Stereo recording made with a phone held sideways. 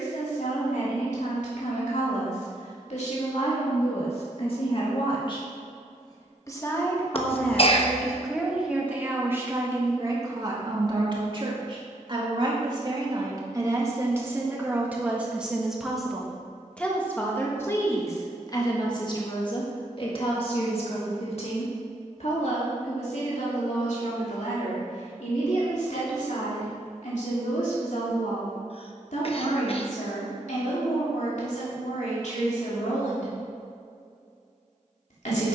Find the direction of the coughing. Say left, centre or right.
left.